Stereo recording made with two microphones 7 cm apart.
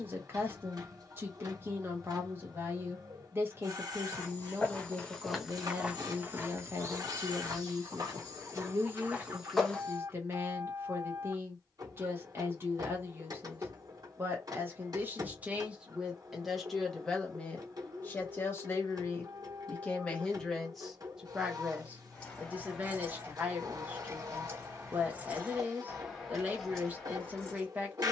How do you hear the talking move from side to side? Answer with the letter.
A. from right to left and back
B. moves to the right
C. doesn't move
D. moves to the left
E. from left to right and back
A.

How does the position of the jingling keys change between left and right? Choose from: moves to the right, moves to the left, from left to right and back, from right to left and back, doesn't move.
from left to right and back.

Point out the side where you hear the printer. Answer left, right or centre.
right.